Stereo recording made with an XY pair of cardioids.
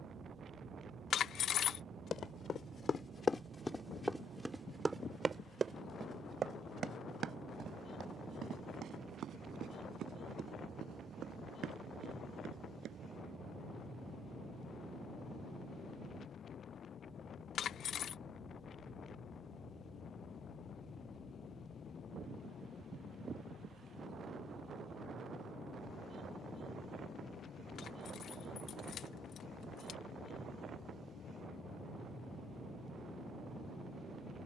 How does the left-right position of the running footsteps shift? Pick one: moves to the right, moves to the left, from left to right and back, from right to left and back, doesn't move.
moves to the right.